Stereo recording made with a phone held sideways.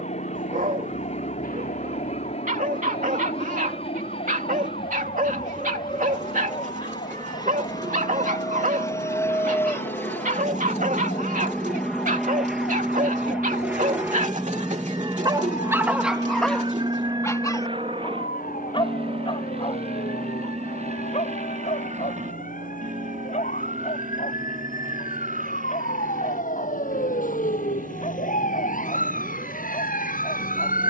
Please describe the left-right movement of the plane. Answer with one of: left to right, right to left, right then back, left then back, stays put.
left to right.